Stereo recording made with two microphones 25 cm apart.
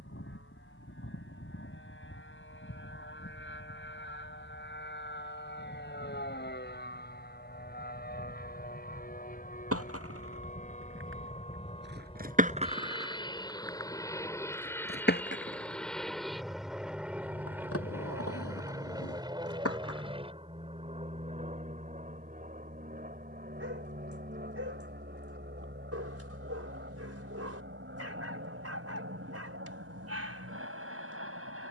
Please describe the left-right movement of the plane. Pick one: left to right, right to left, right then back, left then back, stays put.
left to right.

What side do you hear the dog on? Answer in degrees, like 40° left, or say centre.
70° right.